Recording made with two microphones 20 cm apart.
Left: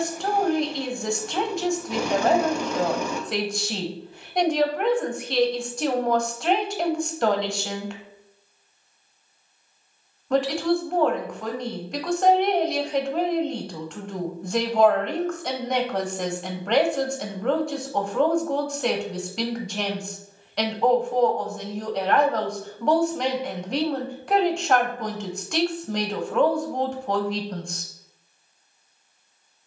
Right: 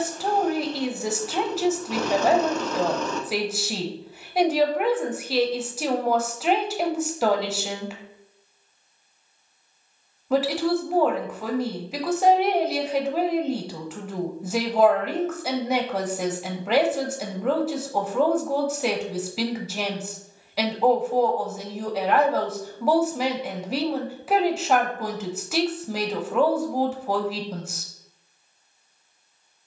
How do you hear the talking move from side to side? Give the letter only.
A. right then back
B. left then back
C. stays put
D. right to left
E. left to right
C.